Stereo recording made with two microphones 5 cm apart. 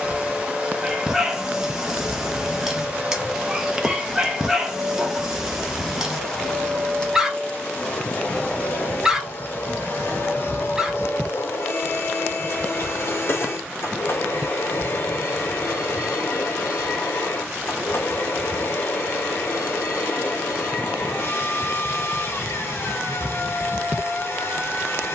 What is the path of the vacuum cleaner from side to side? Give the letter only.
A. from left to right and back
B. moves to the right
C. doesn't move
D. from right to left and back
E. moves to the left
E.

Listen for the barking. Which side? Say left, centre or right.
centre.